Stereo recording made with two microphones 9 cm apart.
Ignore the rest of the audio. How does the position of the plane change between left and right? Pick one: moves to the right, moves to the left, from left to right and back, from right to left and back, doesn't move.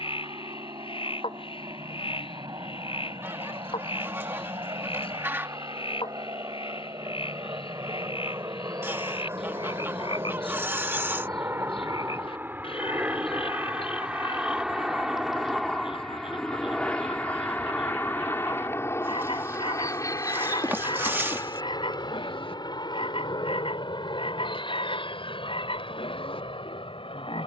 moves to the left.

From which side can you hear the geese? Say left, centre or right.
right.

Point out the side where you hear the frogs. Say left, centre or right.
left.